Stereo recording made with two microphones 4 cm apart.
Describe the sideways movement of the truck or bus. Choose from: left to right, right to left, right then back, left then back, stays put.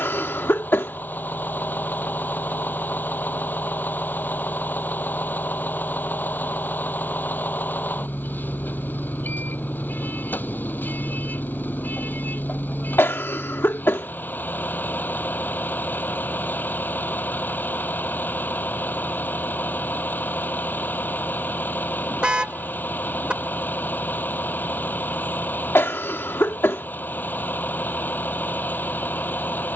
stays put.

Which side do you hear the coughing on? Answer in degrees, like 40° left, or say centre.
60° left.